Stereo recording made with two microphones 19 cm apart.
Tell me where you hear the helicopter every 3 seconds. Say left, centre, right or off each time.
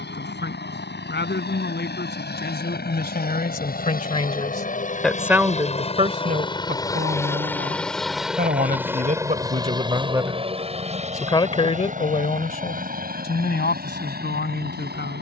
left, left, centre, right, right.